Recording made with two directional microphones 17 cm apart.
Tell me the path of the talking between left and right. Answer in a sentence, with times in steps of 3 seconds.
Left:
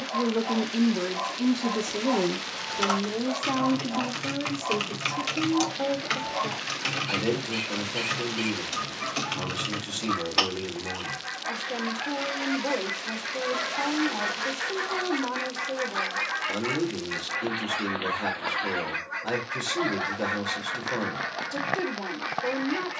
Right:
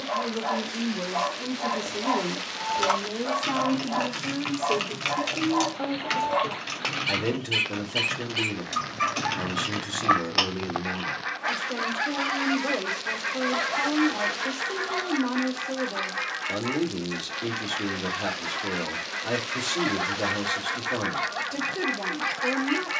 In this clip you hear the talking on the left from 0 s and in the centre from 3 s.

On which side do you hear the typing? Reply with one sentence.
In this clip you hear the typing in the centre.